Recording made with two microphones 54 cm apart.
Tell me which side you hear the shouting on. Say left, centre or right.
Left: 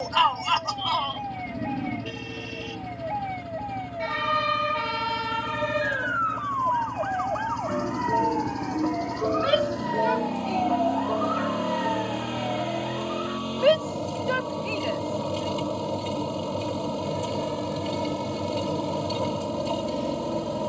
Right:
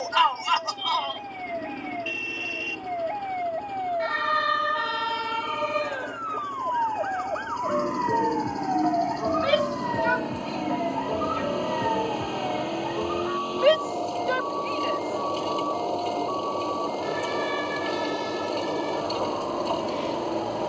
right.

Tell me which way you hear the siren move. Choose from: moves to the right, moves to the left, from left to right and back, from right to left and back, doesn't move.
moves to the right.